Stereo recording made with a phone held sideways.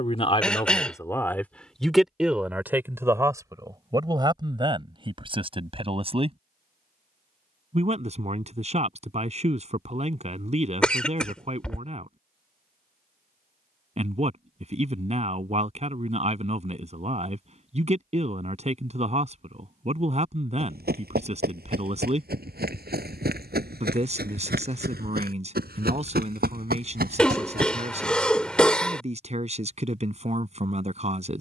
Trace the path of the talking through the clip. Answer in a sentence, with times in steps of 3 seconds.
In this clip you hear the talking in the centre from 0 s and on the right from 3 s.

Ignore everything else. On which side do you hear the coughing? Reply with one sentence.
In this clip you hear the coughing in the centre.